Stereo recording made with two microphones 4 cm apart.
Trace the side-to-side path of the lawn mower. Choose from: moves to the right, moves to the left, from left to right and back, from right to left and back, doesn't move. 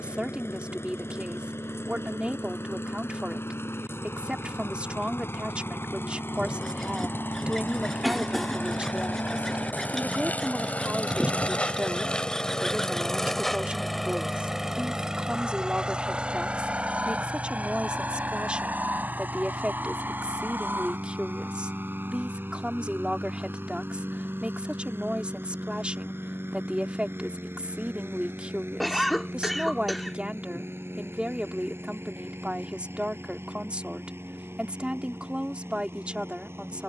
moves to the right.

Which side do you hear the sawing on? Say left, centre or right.
centre.